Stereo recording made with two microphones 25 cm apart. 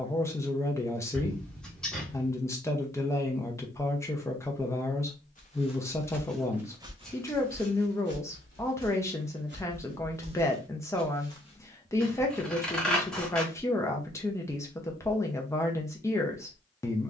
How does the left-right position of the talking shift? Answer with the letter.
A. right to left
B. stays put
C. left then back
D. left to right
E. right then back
B.